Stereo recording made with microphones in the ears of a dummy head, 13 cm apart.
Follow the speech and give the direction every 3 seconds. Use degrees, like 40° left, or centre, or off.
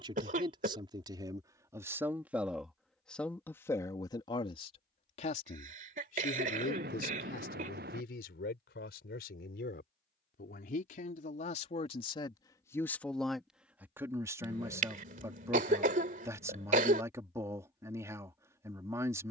20° right, 30° left, 70° left, 60° left, centre, 20° right, 20° right.